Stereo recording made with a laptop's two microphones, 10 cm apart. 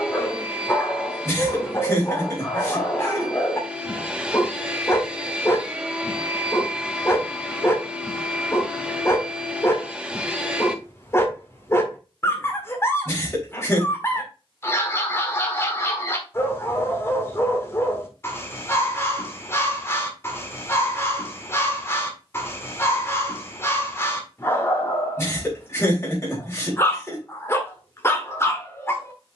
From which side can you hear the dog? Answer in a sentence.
You can hear the dog on the left.